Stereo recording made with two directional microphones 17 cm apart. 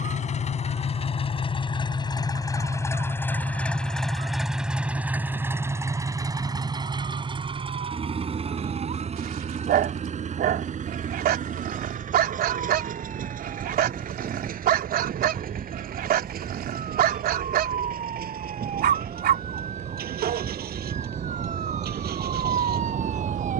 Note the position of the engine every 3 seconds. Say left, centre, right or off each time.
left, centre, right, right, right, right, right, right.